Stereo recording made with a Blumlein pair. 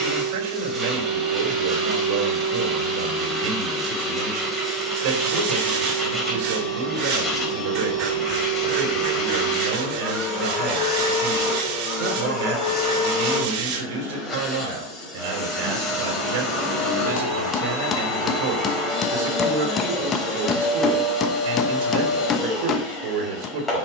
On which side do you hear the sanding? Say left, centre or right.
right.